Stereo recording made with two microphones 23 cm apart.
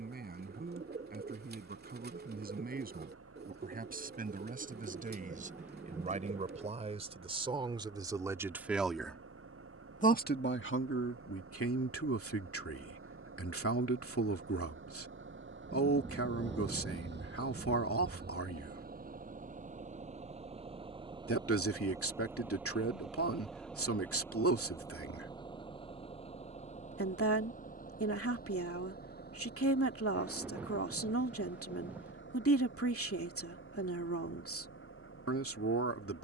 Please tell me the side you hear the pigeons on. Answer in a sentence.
You can hear the pigeons on the right.